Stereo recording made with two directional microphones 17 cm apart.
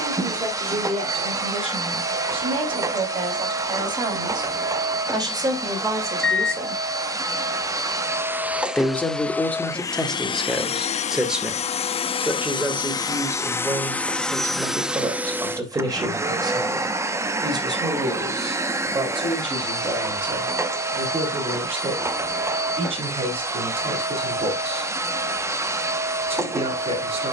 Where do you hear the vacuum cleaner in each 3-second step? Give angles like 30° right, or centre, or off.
20° right, 20° right, 20° right, 30° left, 10° left, 20° right, 20° right, 20° right, 20° right.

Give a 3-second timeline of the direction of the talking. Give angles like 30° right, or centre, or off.
30° right, 30° right, 10° right, centre, 10° right, 20° right, 30° right, 30° right, 30° right.